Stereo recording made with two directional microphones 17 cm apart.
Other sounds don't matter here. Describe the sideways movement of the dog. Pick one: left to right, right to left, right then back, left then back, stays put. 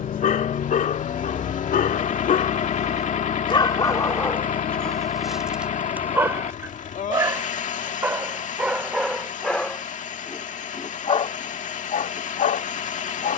right then back.